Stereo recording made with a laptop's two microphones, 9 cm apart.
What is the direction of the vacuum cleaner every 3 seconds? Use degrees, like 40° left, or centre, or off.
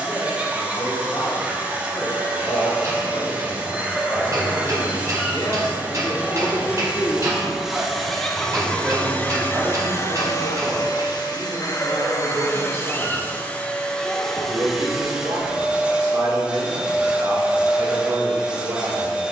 20° right, 20° right, 10° right, 40° left, 20° left, 10° right, 10° right.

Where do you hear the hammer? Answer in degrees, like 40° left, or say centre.
40° right.